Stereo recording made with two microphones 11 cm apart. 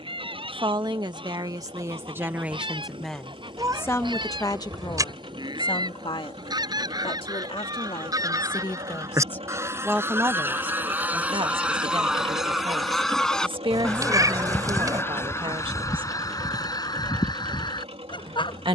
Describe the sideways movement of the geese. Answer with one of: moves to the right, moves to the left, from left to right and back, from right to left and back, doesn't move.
moves to the left.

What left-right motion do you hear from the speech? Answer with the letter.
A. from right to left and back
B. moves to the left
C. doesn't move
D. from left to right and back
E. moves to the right
A.